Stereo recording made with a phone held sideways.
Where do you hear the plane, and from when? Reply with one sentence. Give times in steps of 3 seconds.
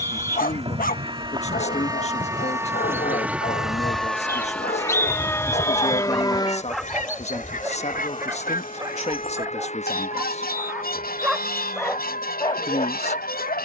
In this clip you hear the plane on the right from 0 s, in the centre from 3 s and on the left from 6 s.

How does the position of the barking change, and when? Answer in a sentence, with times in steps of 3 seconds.
In this clip you hear the barking on the left from 0 s, in the centre from 6 s and on the left from 12 s.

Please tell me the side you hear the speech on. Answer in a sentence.
In this clip you hear the speech on the left.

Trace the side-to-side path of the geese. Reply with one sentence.
You can hear the geese go from the right side to the left.